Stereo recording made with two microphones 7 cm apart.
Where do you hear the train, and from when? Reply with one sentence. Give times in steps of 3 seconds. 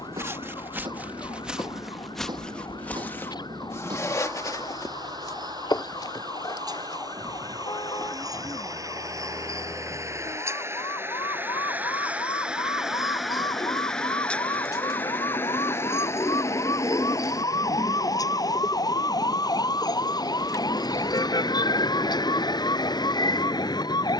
You can hear the train on the right from 0 s, in the centre from 12 s and on the left from 15 s.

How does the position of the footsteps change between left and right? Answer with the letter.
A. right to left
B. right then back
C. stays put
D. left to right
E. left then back
A.